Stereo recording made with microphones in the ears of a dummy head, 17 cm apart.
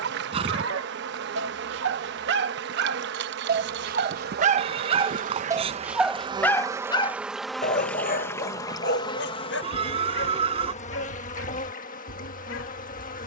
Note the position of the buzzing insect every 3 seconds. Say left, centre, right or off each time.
right, right, centre, left, left.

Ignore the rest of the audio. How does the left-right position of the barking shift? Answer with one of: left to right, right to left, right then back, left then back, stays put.
right to left.